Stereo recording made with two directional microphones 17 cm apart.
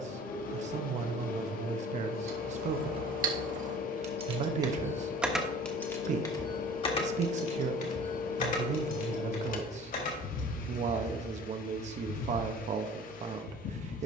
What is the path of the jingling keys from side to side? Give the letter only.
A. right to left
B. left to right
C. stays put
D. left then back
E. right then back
A.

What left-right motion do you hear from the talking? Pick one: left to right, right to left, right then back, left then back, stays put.
stays put.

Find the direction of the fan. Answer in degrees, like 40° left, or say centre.
50° left.